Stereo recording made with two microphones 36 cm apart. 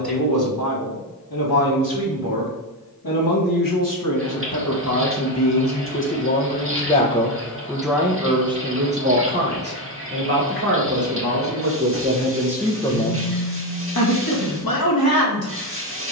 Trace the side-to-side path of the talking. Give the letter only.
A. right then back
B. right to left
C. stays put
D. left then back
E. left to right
A.